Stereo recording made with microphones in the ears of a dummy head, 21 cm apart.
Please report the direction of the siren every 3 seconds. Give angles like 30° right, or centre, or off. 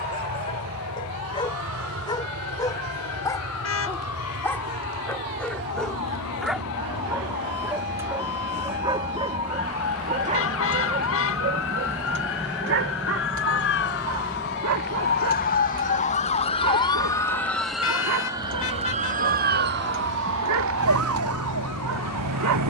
70° left, 70° left, 70° left, 60° left, 50° left, 20° left, 40° right, 70° right.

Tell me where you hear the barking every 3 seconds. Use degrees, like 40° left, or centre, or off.
20° left, 10° left, 10° right, 30° right, 60° right, 70° right, 70° right, 70° right.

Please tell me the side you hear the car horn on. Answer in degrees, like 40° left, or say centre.
60° left.